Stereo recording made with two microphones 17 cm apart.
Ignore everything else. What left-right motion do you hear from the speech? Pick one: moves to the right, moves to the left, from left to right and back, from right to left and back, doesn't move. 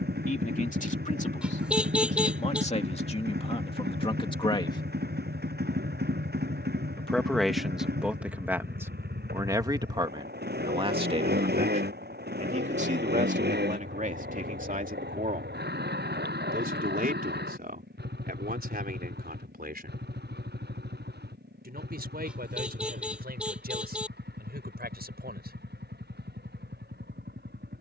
moves to the right.